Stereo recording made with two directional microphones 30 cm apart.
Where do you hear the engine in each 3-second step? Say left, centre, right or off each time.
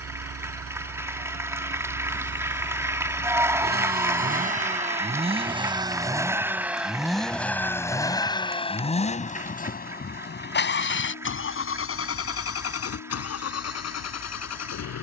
right, right, centre, left, left.